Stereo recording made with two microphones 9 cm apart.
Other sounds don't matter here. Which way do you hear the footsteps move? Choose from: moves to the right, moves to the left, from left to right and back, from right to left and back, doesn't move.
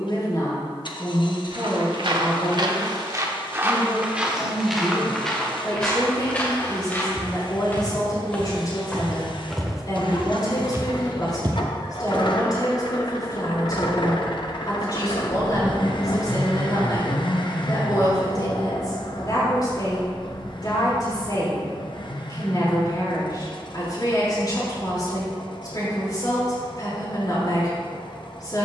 from right to left and back.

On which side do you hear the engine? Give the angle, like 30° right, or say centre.
60° left.